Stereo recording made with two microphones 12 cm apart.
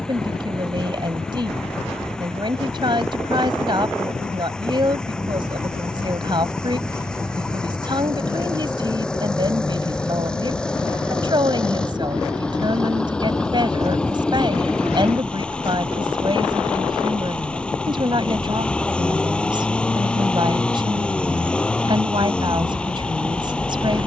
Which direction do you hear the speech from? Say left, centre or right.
right.